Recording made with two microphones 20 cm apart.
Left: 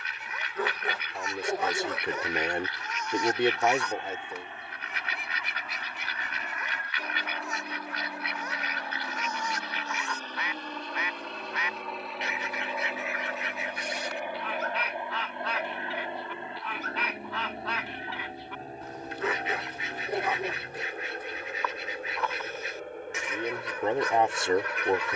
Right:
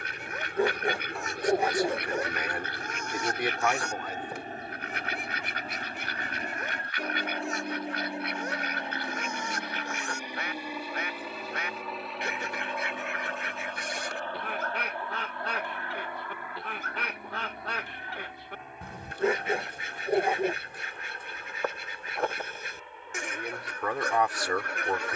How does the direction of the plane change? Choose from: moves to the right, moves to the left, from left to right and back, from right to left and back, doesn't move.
moves to the left.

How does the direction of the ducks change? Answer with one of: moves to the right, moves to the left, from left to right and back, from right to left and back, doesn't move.
doesn't move.